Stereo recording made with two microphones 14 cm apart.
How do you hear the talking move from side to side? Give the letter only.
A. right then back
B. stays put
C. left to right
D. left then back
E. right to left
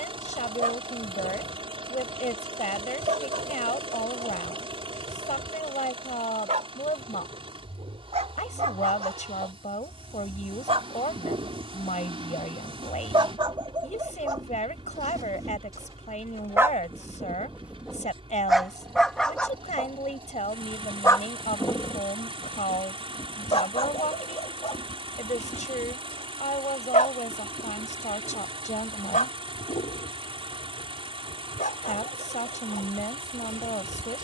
B.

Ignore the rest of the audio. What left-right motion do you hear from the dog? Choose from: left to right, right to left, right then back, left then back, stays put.
right to left.